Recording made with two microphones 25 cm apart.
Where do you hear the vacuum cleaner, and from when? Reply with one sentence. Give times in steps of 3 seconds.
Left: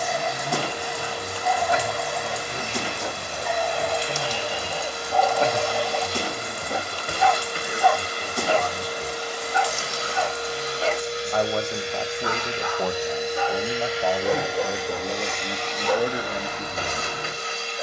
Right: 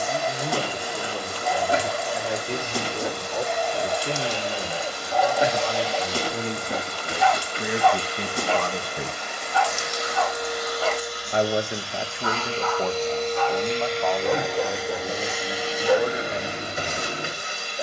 In this clip you hear the vacuum cleaner on the left from 0 s and in the centre from 12 s.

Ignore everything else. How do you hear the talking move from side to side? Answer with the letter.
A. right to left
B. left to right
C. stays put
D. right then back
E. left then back
A.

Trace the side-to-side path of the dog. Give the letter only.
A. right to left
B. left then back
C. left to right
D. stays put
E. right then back
B.